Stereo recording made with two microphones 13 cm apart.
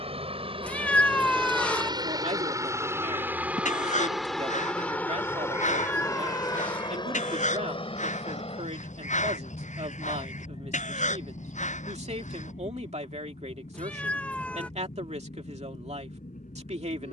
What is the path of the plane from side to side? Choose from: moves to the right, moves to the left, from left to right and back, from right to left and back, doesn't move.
moves to the left.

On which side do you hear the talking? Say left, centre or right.
right.